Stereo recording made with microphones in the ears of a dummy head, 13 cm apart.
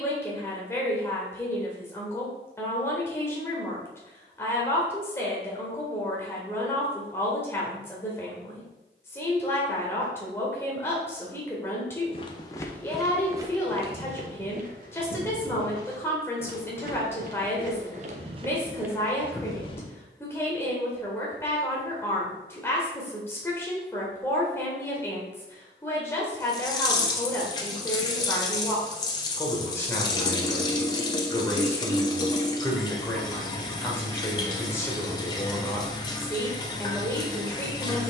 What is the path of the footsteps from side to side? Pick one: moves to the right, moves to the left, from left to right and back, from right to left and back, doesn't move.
from left to right and back.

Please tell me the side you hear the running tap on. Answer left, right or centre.
left.